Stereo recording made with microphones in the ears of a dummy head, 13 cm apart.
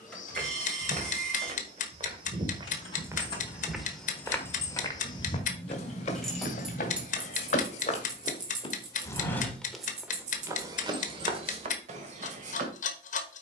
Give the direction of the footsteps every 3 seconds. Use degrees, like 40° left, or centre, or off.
40° right, 10° left, 50° left, 20° right, 50° right.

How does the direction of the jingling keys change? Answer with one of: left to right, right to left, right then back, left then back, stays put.
left to right.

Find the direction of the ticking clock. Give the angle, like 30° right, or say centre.
50° left.